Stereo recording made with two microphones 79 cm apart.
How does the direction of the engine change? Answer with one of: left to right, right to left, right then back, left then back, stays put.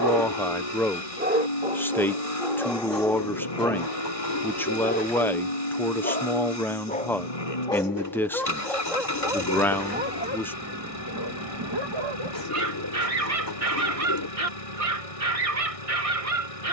stays put.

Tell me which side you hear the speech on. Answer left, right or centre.
centre.